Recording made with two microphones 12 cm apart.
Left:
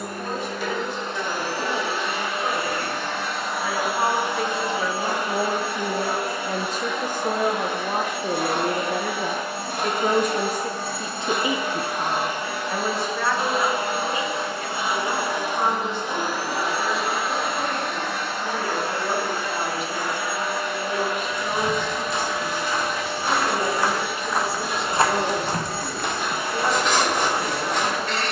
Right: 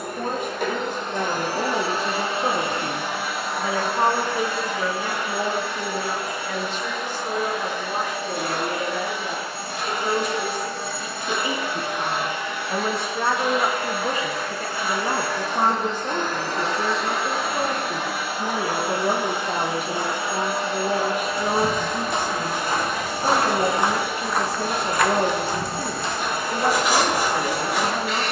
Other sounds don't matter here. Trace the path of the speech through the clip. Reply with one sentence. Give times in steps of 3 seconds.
In this clip you hear the speech on the right from 0 s, in the centre from 3 s, on the left from 6 s and on the right from 12 s.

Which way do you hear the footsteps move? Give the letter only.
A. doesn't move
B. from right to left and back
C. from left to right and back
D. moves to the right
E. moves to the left
E.